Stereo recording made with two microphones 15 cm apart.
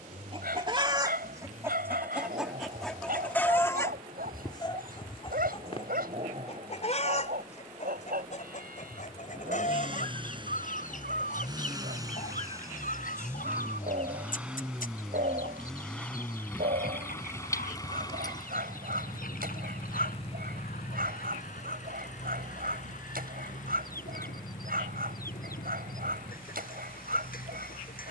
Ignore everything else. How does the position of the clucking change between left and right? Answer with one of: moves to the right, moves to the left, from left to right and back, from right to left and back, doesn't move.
moves to the left.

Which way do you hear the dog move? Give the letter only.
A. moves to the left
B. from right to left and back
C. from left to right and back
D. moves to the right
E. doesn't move
E.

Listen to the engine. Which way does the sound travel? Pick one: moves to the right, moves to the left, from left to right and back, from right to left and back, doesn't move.
moves to the left.